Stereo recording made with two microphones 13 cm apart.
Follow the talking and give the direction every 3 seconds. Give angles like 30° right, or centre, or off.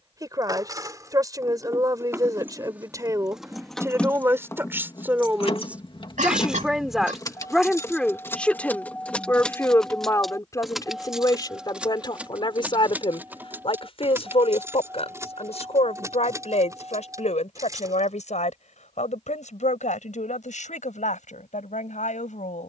30° right, 20° right, centre, 30° left, 50° left, 60° left, 70° left, 80° left.